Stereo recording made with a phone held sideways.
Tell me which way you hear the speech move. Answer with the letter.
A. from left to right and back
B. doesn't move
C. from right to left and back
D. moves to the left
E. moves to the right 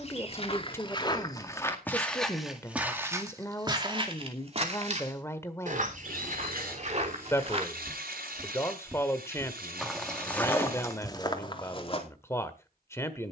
B.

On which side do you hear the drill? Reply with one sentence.
You can hear the drill on the right.